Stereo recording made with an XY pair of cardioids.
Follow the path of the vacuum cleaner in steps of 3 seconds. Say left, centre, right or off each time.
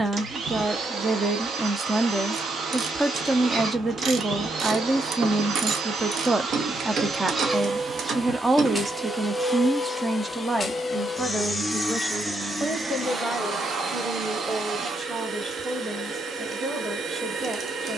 right, right, right, centre, right, right.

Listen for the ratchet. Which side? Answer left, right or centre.
right.